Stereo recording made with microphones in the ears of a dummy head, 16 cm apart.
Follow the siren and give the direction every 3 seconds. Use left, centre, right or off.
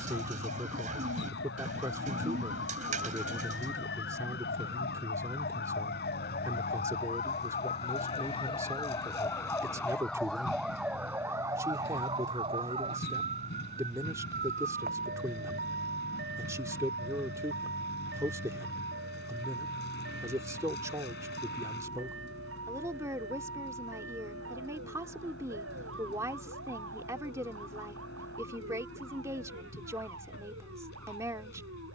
left, left, left, centre, right, right, right, right, right, right, right.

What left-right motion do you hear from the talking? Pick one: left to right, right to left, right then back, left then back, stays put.
stays put.